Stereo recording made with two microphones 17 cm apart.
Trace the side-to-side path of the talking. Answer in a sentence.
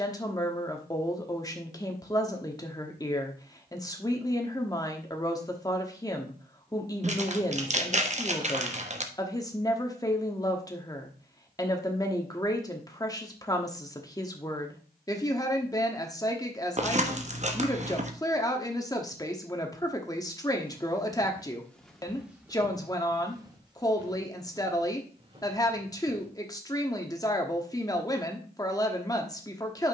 In this clip you hear the talking stay in one place.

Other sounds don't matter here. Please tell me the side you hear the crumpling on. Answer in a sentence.
In this clip you hear the crumpling on the right.